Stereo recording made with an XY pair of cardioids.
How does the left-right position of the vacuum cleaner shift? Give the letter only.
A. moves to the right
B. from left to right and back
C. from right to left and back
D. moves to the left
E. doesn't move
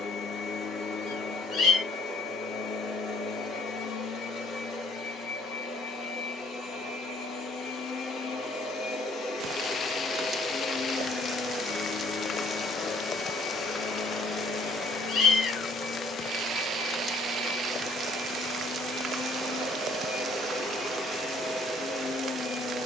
E.